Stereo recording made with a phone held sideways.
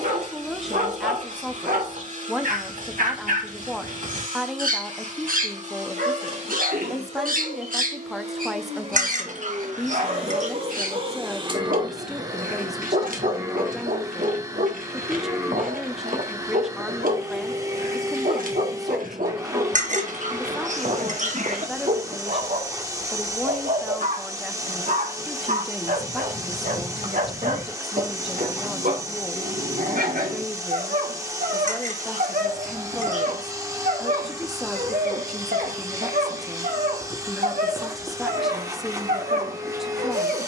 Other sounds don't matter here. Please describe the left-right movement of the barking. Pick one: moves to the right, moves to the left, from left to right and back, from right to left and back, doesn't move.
doesn't move.